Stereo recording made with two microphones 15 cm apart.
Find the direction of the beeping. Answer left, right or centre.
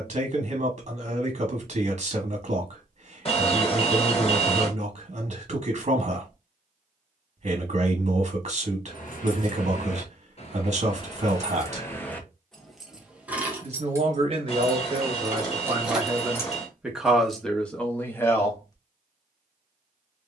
left.